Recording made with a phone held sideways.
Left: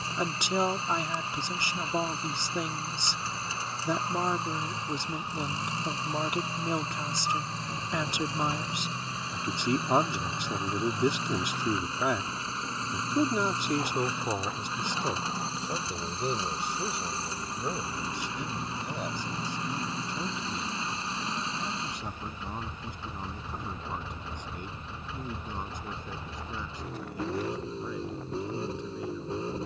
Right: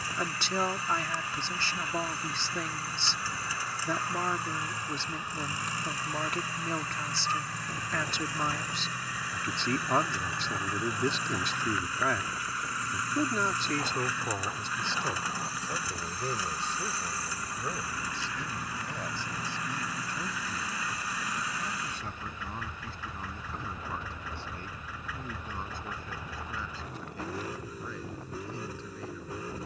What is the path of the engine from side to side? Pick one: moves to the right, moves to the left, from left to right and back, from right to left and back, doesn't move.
doesn't move.